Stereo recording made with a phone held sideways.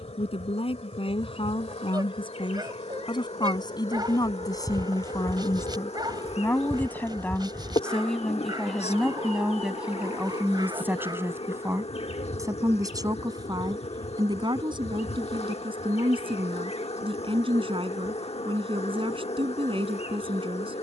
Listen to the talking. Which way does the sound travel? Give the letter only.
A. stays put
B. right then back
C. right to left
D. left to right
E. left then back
D.